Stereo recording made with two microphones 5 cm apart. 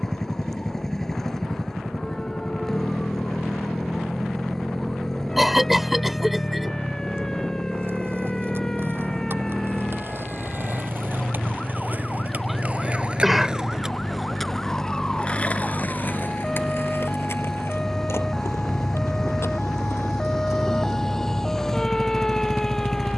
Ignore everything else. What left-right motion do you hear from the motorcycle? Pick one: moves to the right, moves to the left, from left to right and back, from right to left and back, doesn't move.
doesn't move.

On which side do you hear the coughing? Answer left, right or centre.
centre.